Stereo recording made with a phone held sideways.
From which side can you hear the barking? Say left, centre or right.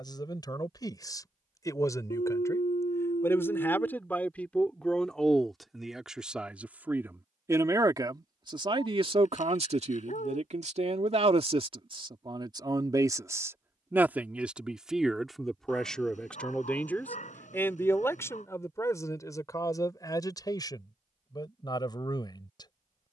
left.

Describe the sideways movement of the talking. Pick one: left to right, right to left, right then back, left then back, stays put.
right then back.